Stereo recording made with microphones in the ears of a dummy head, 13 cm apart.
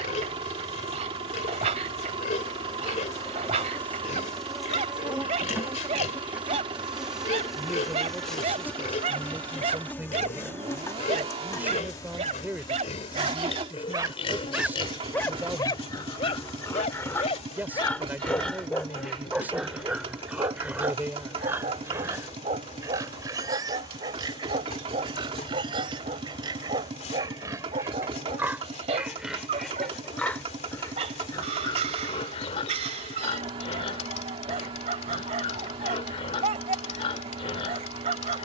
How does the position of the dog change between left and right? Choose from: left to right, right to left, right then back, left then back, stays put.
left then back.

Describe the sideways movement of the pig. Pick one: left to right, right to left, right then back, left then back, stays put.
right then back.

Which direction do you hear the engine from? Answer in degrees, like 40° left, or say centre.
40° right.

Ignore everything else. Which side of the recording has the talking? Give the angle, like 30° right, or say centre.
10° right.